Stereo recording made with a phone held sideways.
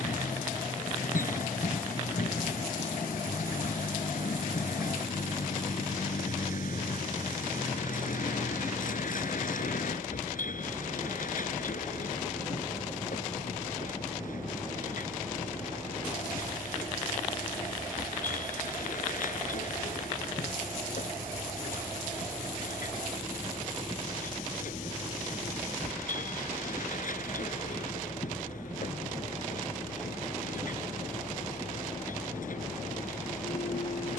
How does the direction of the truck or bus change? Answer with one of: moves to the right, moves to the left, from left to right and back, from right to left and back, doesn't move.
doesn't move.